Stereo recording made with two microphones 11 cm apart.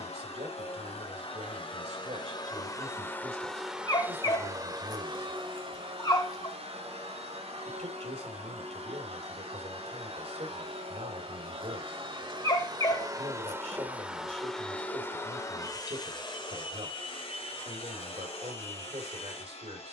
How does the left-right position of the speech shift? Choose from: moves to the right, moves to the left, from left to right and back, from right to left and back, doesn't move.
doesn't move.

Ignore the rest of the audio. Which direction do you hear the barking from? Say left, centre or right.
left.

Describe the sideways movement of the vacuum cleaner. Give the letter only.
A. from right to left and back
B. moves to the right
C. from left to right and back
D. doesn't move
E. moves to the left
C.